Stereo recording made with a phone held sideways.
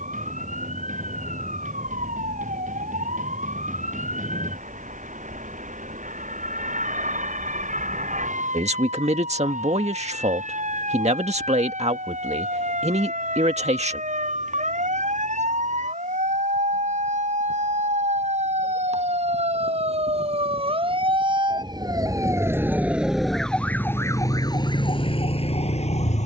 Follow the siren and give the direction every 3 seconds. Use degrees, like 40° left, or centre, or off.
80° right, 80° right, 80° right, 70° right, 70° right, 70° right, 50° right, 20° right, 40° left.